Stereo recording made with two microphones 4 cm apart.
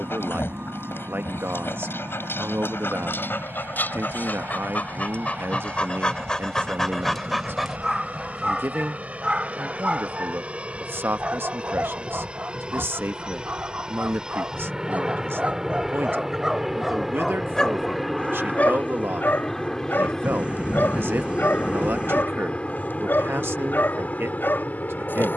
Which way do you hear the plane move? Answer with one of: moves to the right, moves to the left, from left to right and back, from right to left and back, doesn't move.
moves to the left.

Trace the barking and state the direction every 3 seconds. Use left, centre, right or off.
left, left, centre, right, right, centre, left, left, left.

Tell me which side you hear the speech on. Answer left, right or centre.
right.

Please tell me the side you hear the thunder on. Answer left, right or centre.
right.